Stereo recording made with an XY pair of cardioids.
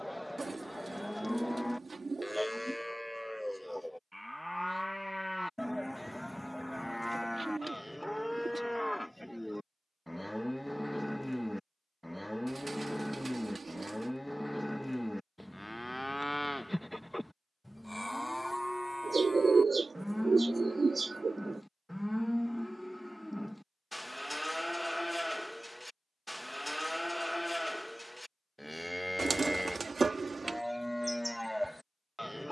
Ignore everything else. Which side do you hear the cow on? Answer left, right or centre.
centre.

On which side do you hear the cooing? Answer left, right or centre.
right.